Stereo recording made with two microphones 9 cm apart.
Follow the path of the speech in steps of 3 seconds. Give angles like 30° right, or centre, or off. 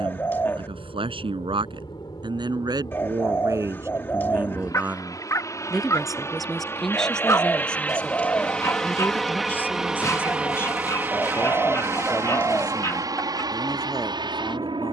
50° right, 20° right, 10° left, 20° left, 20° left.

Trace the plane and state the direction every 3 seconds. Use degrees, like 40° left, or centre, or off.
50° left, 40° left, 20° left, 10° right, 40° right.